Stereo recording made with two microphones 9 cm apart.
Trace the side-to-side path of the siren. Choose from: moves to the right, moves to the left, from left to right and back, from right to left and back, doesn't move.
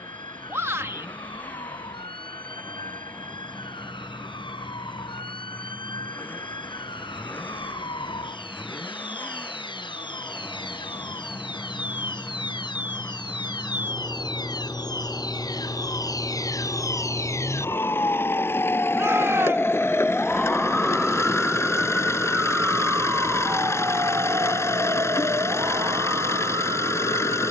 moves to the right.